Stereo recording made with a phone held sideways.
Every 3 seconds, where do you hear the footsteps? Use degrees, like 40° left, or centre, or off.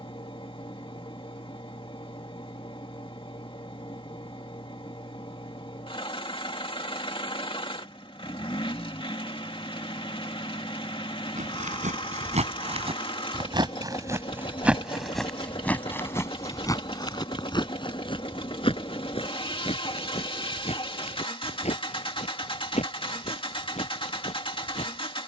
off, off, off, 60° right, 30° right, 20° left, 50° left, 50° left, 60° left.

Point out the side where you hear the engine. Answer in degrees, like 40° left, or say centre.
40° left.